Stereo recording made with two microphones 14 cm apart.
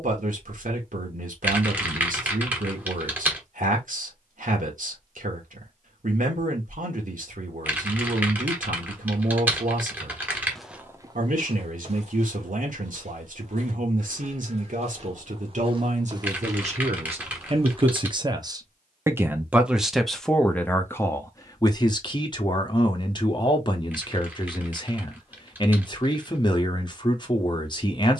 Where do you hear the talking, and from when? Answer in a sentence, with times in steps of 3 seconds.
You can hear the talking on the right from 0 s, in the centre from 18 s and on the left from 21 s.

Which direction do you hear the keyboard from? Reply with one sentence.
You can hear the keyboard in the centre.